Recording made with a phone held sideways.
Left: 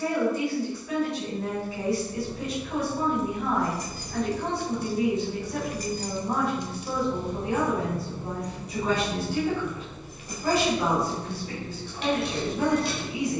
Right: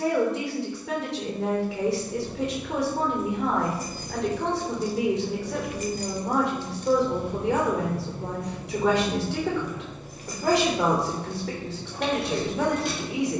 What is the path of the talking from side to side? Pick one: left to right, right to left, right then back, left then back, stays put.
stays put.